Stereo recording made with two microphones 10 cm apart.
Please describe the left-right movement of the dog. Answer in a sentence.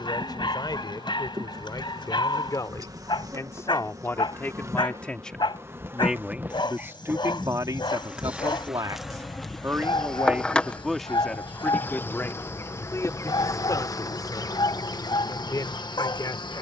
In this clip you hear the dog stay put.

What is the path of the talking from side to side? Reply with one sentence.
In this clip you hear the talking go right and come back.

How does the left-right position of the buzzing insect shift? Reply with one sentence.
In this clip you hear the buzzing insect move to the left.